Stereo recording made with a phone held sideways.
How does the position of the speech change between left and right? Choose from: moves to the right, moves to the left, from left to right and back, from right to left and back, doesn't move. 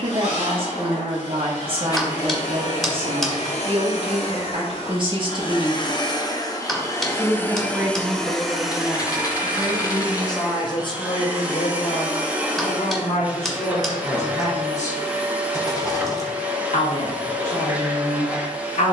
moves to the left.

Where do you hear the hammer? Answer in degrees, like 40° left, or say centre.
centre.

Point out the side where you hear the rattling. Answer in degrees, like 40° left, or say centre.
30° left.